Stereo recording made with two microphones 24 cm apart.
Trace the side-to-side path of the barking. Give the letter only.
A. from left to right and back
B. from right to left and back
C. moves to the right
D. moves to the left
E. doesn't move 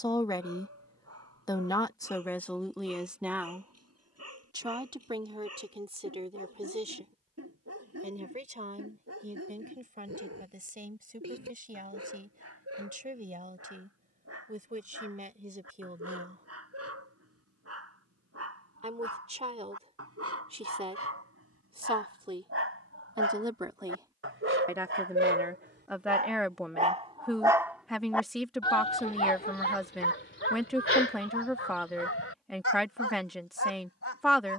D.